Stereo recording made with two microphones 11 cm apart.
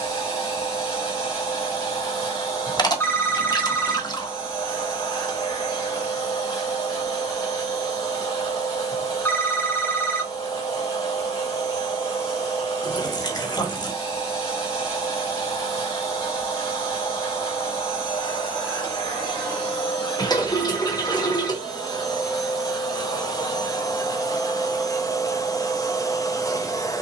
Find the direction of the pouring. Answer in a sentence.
You can hear the pouring on the left.